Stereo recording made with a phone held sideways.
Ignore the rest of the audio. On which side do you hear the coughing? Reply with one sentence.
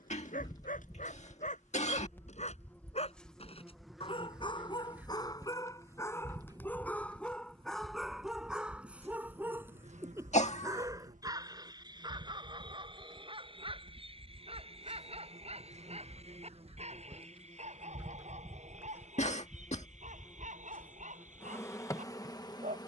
In this clip you hear the coughing on the left.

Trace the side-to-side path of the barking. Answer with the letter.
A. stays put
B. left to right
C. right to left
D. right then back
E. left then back
B.